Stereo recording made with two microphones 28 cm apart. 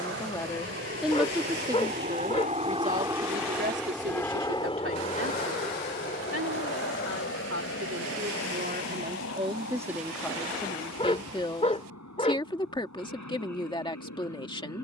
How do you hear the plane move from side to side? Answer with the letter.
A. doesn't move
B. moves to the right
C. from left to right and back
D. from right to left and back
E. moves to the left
E.